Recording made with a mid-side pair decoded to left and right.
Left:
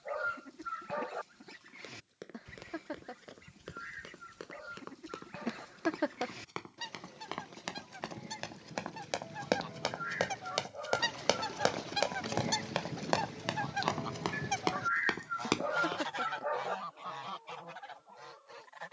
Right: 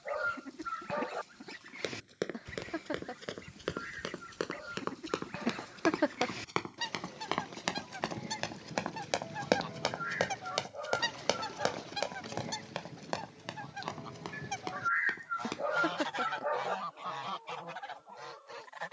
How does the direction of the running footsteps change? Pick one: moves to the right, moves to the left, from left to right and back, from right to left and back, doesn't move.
moves to the left.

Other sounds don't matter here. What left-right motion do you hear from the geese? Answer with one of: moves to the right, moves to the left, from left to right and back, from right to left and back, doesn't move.
from right to left and back.